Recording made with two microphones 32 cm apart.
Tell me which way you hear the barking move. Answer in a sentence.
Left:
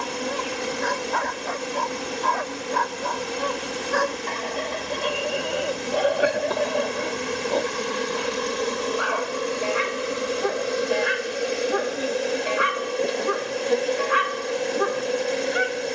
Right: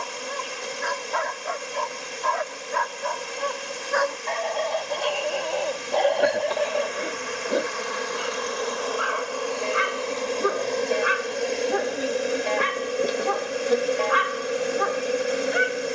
You can hear the barking move from left to right and back again.